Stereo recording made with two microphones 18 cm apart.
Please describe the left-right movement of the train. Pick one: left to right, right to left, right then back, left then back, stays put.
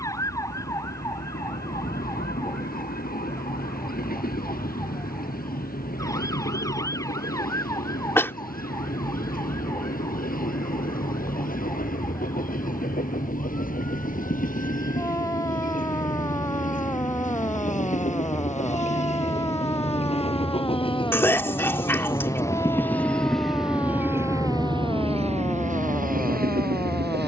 left to right.